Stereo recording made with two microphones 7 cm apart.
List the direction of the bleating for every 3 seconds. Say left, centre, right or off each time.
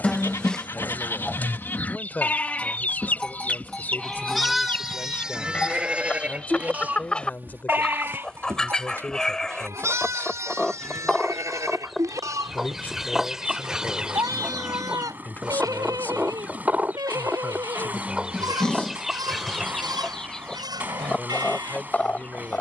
left, centre, right, right, right, right, right, right.